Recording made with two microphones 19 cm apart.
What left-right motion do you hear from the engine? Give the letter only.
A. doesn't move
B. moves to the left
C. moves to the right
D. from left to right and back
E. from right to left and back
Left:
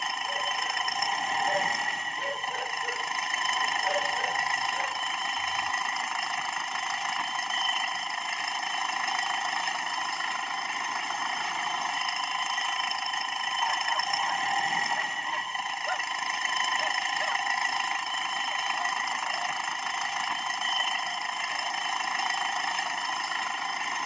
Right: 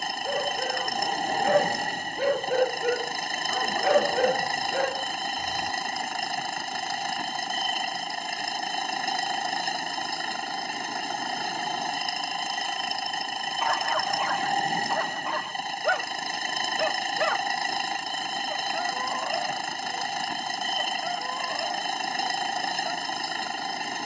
A.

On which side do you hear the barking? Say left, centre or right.
right.